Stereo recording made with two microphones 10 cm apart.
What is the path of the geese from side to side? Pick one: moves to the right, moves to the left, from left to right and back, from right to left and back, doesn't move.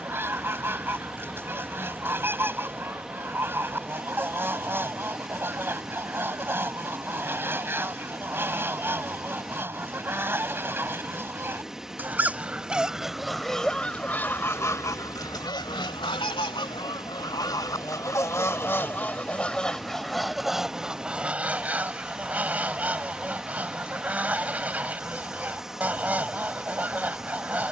from right to left and back.